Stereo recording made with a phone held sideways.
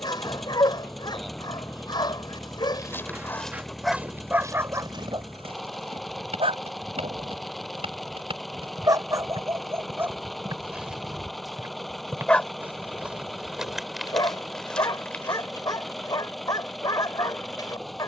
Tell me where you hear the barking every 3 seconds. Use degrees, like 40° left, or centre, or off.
30° left, 10° right, 40° right, 10° right, 20° left, 30° left.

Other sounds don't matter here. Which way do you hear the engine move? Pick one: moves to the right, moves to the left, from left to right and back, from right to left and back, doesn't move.
doesn't move.